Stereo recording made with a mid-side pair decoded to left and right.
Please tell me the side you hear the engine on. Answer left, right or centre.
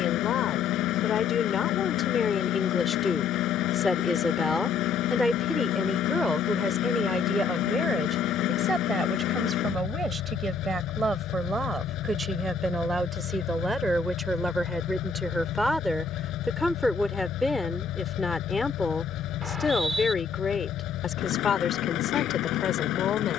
left.